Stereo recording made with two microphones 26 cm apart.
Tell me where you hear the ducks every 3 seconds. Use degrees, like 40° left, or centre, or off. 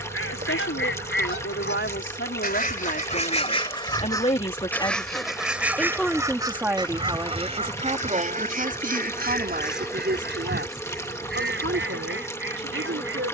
40° left, 10° left, 20° right, 40° right, 50° right.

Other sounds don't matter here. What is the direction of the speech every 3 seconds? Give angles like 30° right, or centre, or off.
50° left, 20° left, 20° right, 40° right, 50° right.